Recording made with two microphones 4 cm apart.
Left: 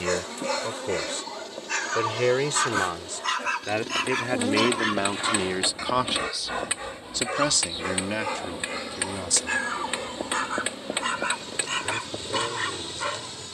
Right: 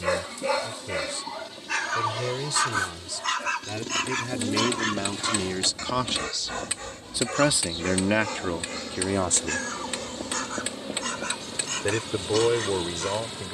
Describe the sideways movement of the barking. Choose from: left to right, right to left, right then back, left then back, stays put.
right to left.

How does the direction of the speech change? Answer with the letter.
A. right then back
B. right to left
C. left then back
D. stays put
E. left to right
E.